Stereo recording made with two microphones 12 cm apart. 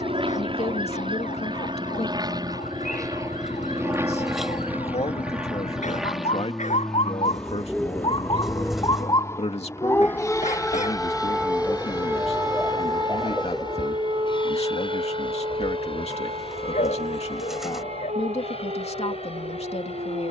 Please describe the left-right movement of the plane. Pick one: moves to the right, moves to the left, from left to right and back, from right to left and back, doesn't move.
moves to the left.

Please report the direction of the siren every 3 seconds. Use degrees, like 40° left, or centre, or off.
80° left, 70° left, 50° left, 10° left, 30° right, 50° right, 60° right.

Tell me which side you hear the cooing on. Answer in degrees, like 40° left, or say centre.
centre.